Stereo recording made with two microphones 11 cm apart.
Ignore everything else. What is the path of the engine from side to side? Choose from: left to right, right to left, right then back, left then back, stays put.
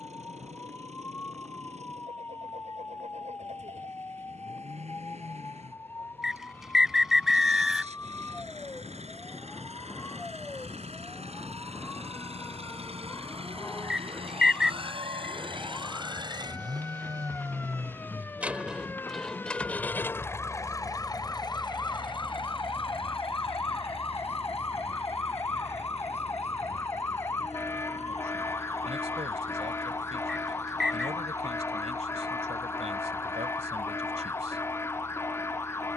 right to left.